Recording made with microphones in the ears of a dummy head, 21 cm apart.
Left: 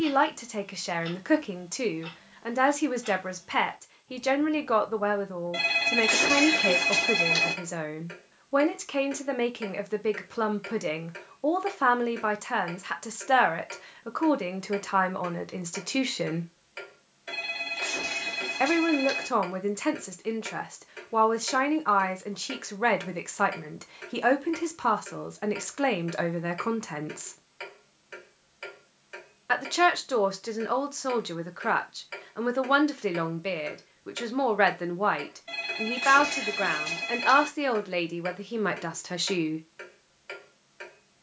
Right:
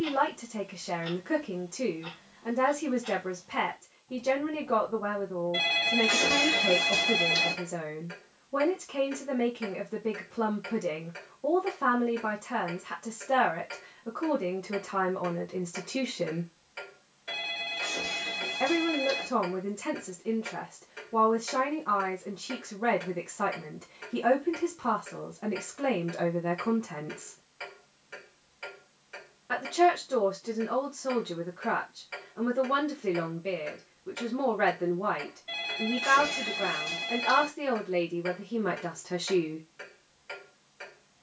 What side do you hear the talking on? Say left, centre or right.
left.